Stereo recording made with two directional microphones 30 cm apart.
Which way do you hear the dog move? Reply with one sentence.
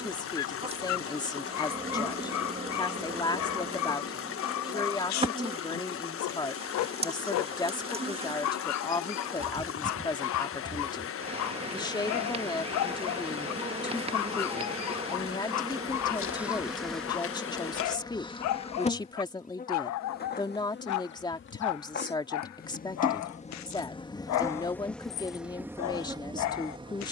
In this clip you hear the dog stay in one place.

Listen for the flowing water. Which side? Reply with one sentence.
In this clip you hear the flowing water on the left.